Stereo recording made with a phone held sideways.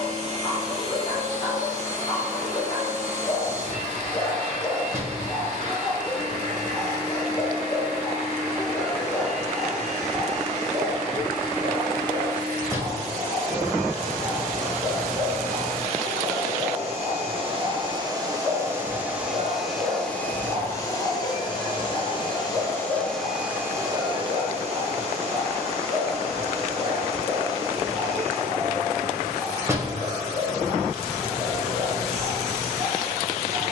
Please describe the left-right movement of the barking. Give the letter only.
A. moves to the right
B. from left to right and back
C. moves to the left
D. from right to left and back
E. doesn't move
A.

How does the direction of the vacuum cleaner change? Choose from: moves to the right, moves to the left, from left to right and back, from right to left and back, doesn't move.
from right to left and back.